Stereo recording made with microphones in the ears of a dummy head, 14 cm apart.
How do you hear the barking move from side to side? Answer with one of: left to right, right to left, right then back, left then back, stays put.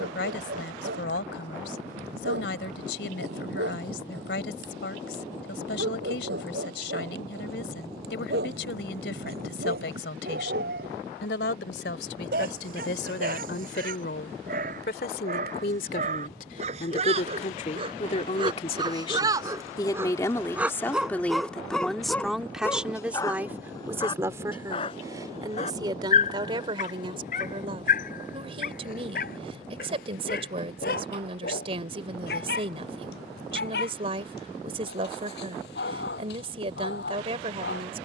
right to left.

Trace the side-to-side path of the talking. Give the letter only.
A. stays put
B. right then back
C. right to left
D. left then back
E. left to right
E.